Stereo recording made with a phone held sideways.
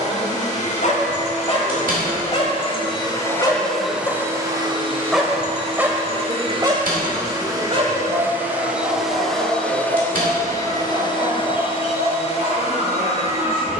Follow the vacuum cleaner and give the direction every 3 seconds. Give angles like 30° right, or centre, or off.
50° left, 20° right, 20° right, 20° left, 40° left.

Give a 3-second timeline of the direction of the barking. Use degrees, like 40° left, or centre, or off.
50° left, centre, 40° right, 60° right, 60° right.